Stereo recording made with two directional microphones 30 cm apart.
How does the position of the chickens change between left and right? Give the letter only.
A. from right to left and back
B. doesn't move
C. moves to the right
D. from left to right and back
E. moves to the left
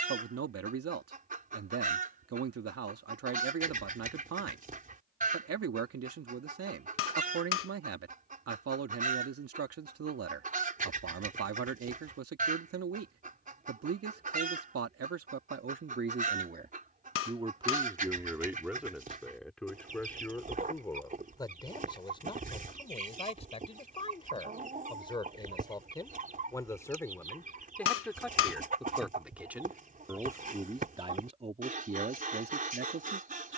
B.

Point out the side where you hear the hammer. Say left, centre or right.
left.